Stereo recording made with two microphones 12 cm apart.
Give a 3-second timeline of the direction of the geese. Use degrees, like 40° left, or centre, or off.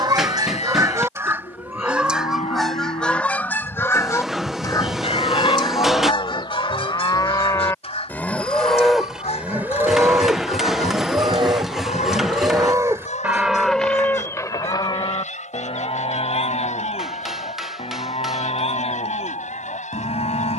20° right, 30° left, 50° left, 60° left, 70° left, 70° left, 80° left.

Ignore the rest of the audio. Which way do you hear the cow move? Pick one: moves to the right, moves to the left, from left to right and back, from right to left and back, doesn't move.
from left to right and back.